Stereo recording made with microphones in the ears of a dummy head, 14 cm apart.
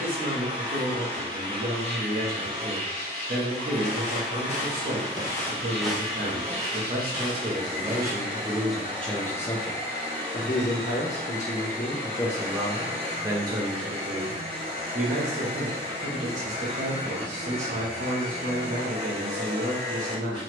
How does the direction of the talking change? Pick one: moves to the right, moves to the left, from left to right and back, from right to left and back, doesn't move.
from right to left and back.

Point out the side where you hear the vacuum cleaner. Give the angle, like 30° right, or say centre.
30° right.